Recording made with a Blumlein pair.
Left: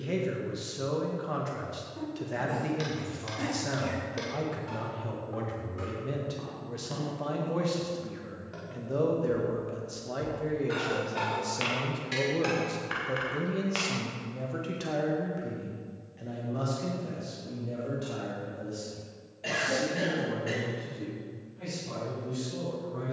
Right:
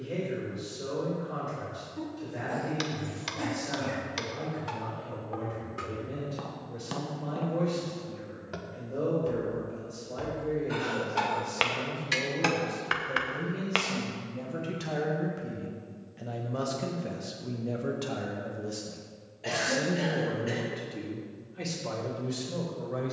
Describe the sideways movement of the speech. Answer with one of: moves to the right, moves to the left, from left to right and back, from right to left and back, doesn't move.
moves to the right.